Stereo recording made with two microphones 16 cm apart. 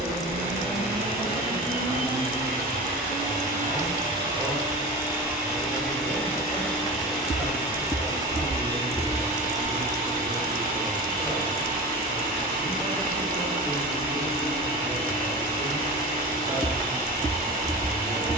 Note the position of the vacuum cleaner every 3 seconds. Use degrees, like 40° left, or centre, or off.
70° right, 30° right, 10° right, 60° right, 60° right, 60° right.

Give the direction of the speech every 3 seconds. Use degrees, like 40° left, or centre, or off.
20° left, centre, 30° right, 40° right, 40° right, 40° right.